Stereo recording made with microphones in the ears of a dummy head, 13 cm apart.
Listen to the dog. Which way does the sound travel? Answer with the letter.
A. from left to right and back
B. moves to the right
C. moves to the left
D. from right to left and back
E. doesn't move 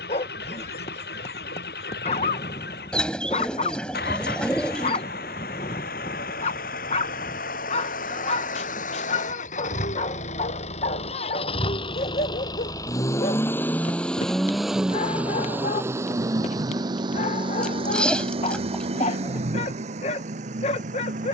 E.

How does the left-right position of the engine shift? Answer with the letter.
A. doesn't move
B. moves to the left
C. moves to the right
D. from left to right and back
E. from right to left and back
C.